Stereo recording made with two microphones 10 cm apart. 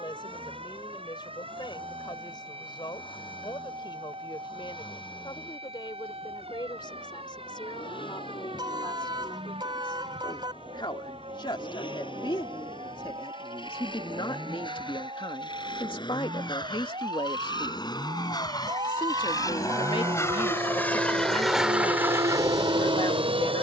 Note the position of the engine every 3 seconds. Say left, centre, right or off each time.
left, left, left, left, left, left, left, right.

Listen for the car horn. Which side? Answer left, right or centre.
right.